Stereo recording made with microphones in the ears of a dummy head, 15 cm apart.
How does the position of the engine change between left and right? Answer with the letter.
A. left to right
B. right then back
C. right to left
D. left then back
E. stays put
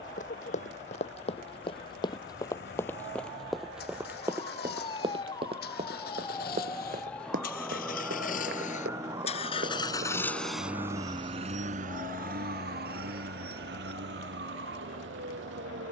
A.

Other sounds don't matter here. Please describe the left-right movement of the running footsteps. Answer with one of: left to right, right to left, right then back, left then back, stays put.
left to right.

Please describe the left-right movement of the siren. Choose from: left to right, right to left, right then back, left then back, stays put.
left to right.